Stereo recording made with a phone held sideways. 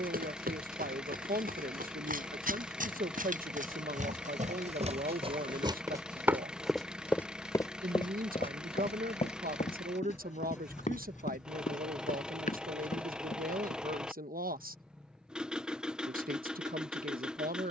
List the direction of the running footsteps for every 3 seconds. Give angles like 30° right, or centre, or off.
80° right, 50° right, 20° left, 50° left, 60° left, off.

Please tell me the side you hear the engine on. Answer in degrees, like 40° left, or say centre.
10° right.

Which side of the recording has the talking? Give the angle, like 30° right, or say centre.
80° right.